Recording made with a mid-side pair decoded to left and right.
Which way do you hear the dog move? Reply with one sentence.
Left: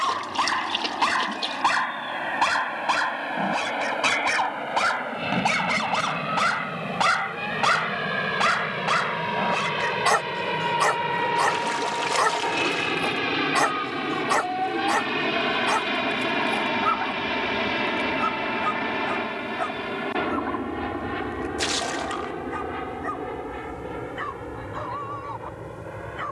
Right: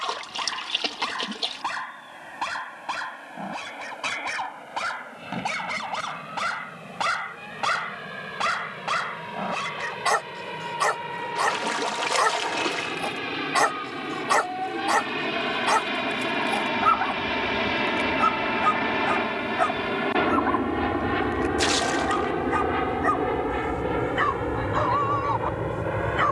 You can hear the dog travel towards the right.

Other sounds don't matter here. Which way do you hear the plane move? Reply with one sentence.
In this clip you hear the plane go from the left side to the right.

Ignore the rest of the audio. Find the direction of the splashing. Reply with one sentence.
You can hear the splashing in the centre.